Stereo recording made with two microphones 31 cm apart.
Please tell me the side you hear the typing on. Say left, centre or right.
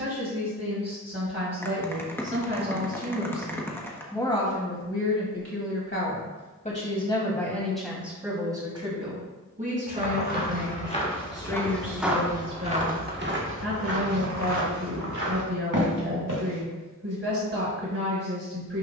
centre.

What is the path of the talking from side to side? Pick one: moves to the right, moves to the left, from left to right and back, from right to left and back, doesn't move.
from right to left and back.